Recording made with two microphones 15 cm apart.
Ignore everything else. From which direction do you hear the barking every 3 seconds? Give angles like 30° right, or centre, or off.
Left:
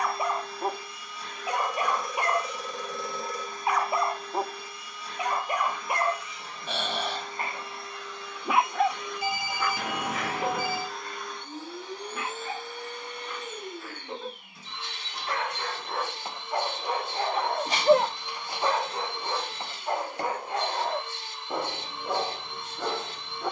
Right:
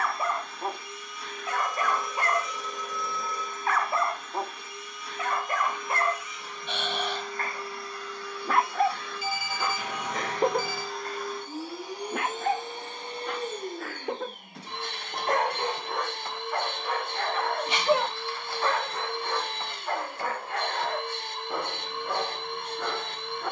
20° left, 20° left, 10° left, 40° right, 70° right, centre, 20° left, 20° left.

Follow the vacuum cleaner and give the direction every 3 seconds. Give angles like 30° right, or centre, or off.
30° left, 30° left, 30° left, centre, 30° right, 60° right, 60° right, 60° right.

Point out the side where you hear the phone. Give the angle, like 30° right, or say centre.
70° left.